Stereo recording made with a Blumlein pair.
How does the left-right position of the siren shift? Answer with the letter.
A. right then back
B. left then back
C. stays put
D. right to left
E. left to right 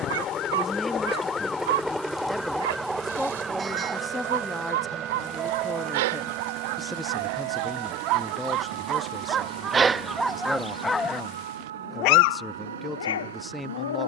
E.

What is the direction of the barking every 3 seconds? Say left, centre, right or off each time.
right, right, right, centre, left.